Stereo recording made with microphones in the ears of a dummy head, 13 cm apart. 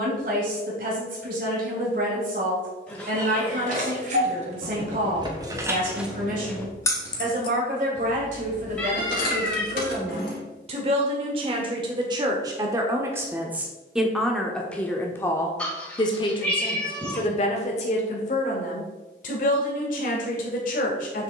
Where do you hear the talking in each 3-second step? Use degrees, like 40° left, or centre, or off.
60° right, 60° right, 60° right, 40° right, 10° right, 30° left, 60° left.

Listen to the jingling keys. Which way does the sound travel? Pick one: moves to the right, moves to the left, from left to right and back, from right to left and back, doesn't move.
moves to the left.